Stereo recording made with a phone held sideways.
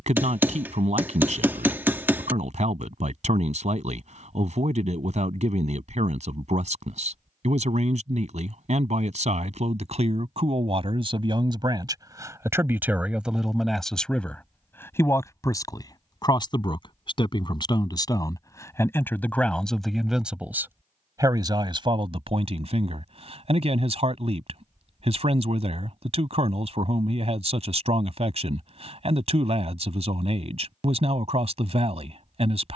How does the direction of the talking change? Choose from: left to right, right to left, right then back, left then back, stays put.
left then back.